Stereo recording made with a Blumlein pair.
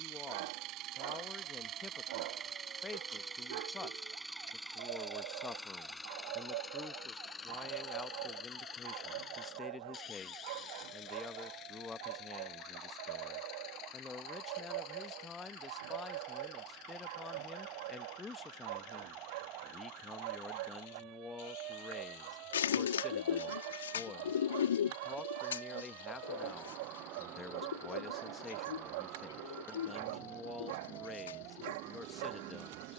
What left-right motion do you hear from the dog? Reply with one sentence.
You can hear the dog stay in one place.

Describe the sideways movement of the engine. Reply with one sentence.
You can hear the engine travel towards the left.